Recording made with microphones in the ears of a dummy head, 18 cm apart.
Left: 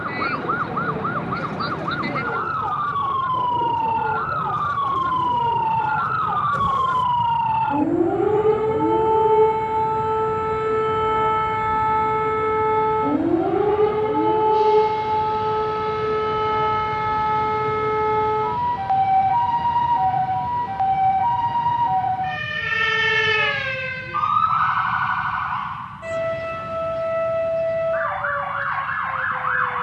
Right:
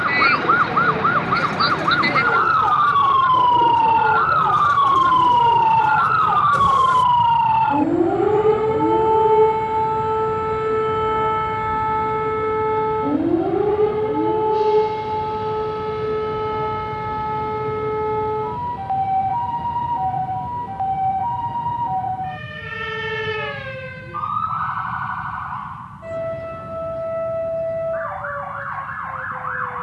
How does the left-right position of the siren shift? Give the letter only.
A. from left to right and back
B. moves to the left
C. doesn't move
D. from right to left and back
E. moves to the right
B.